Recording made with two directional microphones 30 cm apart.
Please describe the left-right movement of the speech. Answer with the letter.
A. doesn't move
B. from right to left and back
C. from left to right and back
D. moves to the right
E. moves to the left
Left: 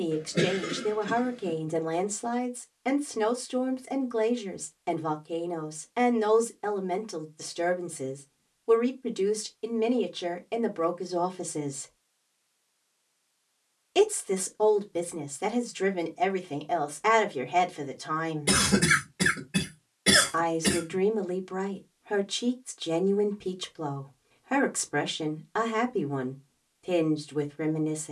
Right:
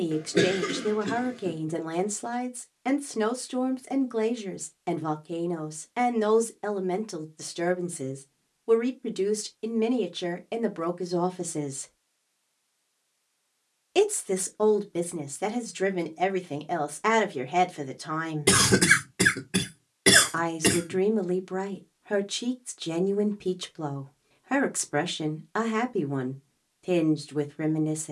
A.